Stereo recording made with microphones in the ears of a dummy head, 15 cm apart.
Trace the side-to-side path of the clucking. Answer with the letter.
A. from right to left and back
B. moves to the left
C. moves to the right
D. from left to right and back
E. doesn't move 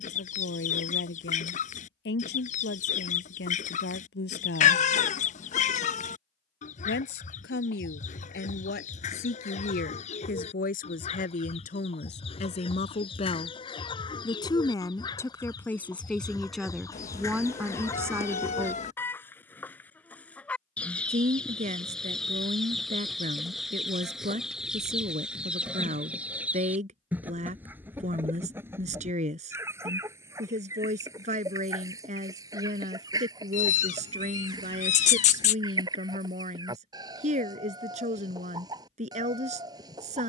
C.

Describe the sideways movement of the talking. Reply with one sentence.
You can hear the talking move from left to right.